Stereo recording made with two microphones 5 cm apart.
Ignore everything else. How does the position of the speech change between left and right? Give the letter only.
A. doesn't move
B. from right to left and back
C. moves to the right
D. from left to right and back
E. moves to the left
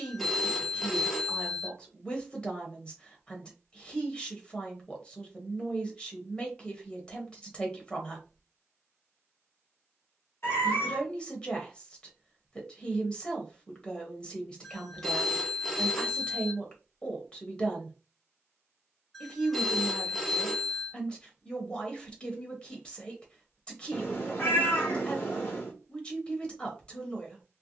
A.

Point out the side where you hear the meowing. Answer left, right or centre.
left.